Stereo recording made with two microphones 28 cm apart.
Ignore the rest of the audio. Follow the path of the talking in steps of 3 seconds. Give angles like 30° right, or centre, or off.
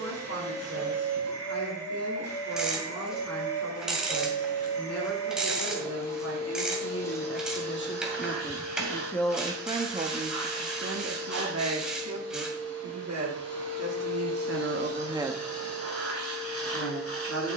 60° left, 60° left, 40° left, 30° right, 60° right, 30° left.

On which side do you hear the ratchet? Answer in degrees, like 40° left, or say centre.
centre.